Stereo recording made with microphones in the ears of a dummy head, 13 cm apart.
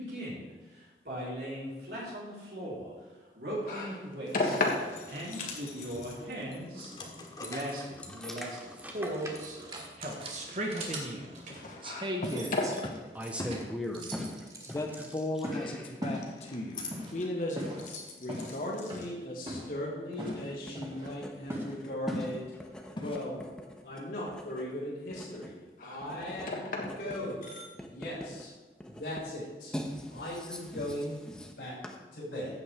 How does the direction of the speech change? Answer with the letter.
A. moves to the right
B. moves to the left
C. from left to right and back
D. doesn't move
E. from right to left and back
B.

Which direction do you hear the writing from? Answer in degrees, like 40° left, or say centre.
centre.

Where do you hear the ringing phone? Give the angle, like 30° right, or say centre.
60° left.